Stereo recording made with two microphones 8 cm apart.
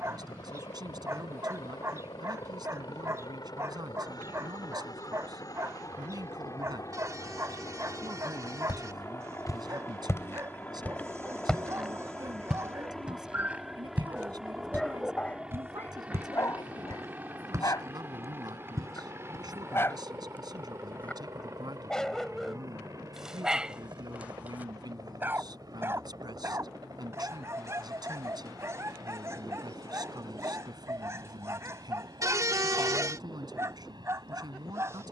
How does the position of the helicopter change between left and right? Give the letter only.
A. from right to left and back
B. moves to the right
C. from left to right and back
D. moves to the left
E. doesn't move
B.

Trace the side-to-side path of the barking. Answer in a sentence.
In this clip you hear the barking move from right to left and back again.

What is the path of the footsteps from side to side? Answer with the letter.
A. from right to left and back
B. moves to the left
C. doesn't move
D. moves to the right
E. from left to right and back
D.